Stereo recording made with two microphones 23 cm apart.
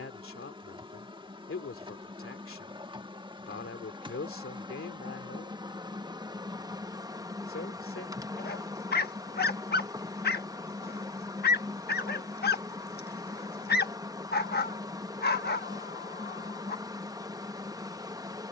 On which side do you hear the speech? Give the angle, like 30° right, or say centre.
60° left.